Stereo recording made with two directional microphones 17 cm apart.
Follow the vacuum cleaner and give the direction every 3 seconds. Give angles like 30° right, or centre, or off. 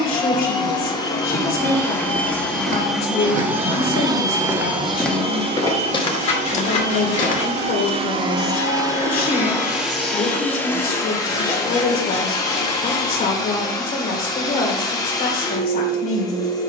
20° left, 20° right, 40° right, 10° left, 20° left, 20° left.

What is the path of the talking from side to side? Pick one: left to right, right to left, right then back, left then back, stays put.
stays put.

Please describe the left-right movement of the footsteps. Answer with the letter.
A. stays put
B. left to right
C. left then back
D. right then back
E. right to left
E.